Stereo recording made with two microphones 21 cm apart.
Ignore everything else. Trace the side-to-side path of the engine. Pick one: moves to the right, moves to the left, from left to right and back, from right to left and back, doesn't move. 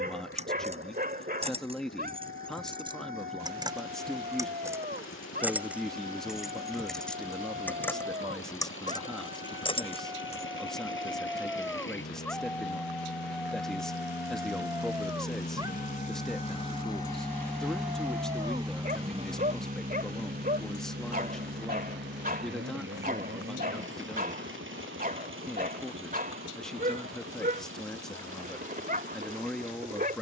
moves to the right.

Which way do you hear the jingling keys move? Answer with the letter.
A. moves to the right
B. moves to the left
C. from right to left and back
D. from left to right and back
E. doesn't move
B.